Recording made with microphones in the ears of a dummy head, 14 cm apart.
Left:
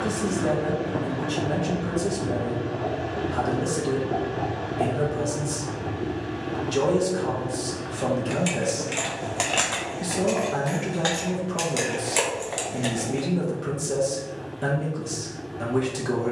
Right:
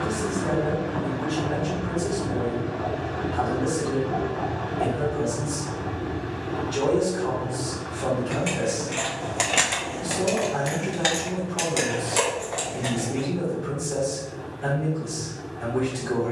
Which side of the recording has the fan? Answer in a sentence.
In this clip you hear the fan on the left.